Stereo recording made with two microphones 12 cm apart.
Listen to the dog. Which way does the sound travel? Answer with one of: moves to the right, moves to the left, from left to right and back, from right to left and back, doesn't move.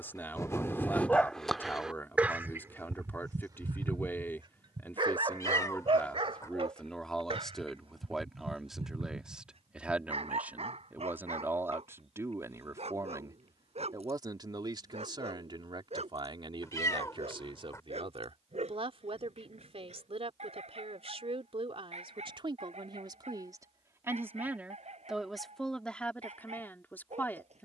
moves to the right.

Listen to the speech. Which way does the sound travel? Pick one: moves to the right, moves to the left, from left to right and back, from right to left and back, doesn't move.
from left to right and back.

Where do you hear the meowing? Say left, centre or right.
left.